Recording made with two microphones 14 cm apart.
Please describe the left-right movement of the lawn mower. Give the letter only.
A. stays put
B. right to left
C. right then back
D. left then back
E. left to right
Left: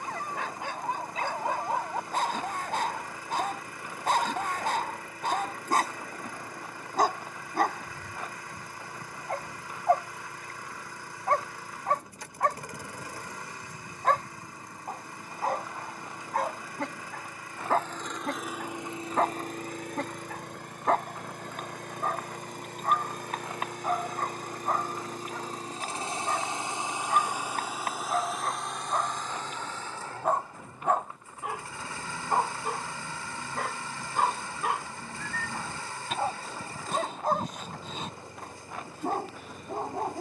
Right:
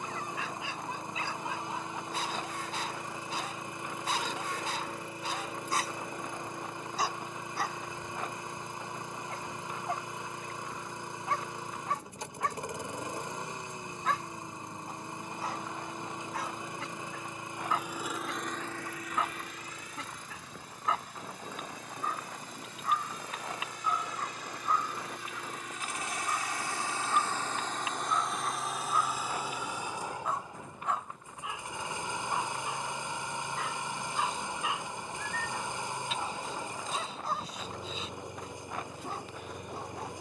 D.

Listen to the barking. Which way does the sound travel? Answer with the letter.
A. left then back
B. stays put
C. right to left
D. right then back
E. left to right
B.